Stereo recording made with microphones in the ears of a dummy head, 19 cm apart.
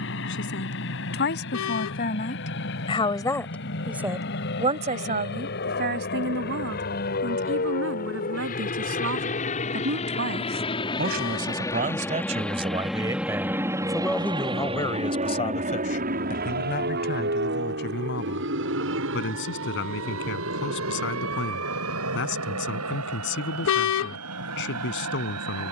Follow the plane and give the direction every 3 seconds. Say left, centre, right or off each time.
left, left, left, left, centre, right, right, right, right.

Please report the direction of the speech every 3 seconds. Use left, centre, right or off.
left, right, right, right, centre, left, left, left, left.